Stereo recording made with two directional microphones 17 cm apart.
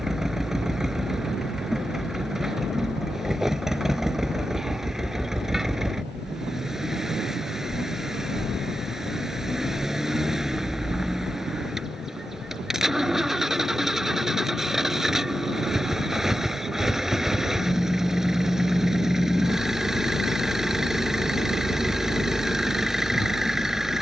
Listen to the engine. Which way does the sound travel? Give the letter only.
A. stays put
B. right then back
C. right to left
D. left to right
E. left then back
A.